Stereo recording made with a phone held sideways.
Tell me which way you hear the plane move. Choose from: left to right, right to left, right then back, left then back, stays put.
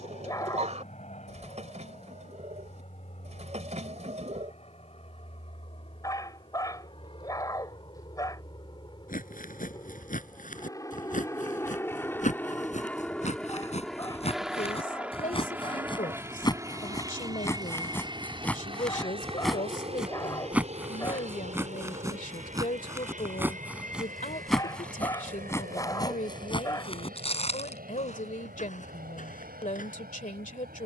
left to right.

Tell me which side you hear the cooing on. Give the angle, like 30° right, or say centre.
50° right.